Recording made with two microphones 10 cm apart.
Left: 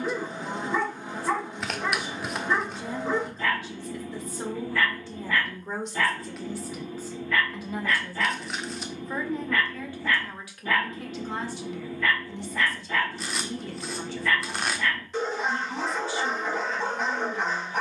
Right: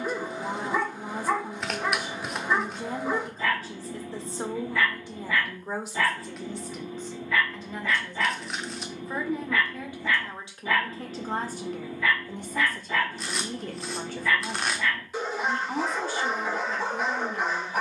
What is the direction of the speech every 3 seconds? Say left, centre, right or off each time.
right, right, centre, right, right, right.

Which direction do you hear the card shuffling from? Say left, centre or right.
centre.